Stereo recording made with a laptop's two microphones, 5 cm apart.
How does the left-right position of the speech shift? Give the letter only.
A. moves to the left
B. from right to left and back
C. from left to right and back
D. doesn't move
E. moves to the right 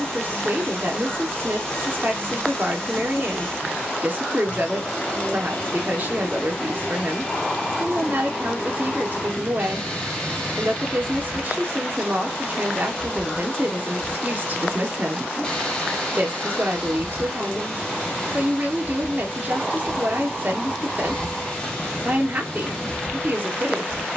D.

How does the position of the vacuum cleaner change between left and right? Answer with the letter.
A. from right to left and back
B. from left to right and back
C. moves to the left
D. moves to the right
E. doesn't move
E.